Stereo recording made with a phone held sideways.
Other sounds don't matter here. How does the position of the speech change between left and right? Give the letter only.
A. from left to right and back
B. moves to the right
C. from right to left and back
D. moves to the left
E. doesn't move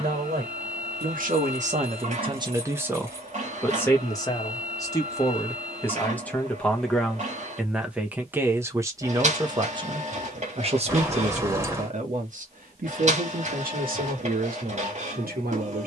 C.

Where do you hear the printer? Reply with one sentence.
You can hear the printer on the right.